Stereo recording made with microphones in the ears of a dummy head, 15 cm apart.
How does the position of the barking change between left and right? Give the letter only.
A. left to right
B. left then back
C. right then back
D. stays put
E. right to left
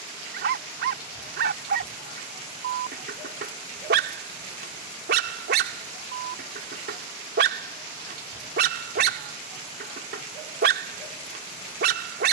D.